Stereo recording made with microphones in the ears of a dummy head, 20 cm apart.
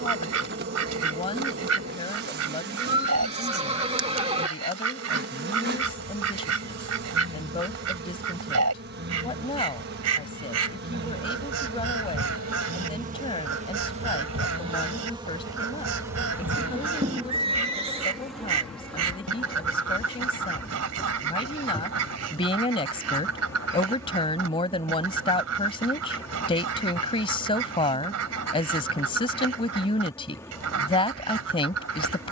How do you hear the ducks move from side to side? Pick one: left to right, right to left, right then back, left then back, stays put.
stays put.